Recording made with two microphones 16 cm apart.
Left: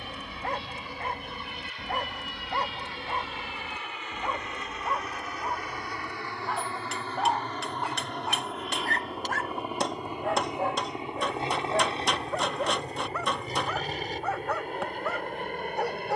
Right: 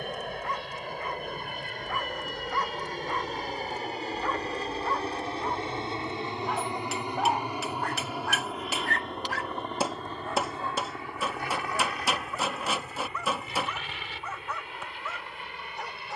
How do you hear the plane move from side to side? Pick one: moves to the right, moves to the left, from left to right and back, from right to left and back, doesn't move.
moves to the left.